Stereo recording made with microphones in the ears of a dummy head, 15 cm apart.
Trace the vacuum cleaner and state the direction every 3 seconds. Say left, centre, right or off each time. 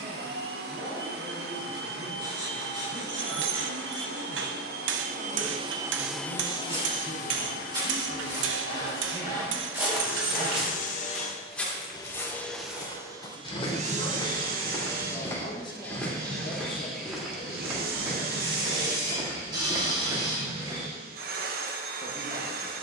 right, right, left, left, right, right, right, right.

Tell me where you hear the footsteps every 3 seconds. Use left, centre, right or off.
off, off, right, centre, left, centre, right, off.